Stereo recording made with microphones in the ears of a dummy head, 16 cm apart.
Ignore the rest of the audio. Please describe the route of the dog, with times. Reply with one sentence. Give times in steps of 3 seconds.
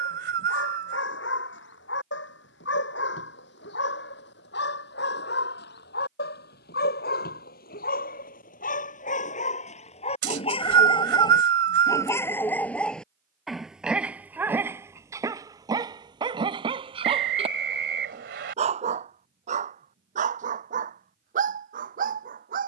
You can hear the dog on the left from 0 s, in the centre from 12 s and on the right from 15 s.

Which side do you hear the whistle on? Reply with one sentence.
You can hear the whistle on the right.